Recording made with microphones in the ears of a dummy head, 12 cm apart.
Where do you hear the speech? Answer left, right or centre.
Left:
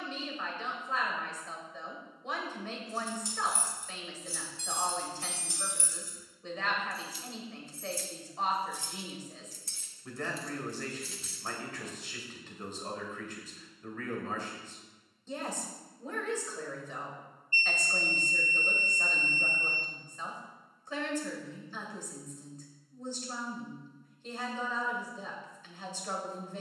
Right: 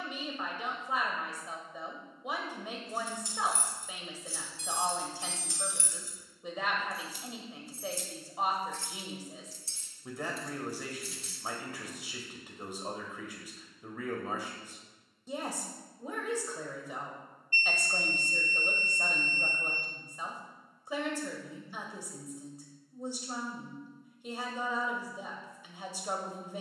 centre.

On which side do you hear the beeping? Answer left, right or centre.
left.